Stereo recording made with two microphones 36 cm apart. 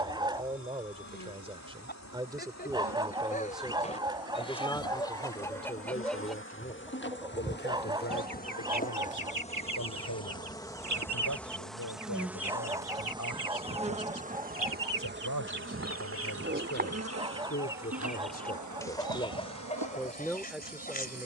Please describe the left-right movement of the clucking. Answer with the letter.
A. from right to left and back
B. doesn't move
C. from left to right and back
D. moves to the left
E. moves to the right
C.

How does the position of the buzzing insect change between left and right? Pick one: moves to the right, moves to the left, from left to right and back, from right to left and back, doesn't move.
moves to the right.